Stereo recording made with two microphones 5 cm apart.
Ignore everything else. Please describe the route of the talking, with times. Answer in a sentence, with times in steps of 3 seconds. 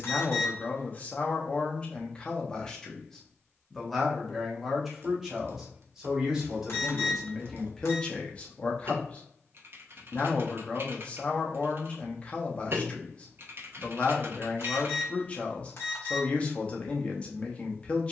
You can hear the talking on the left from 0 s, in the centre from 3 s and on the left from 9 s.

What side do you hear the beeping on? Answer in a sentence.
In this clip you hear the beeping on the left.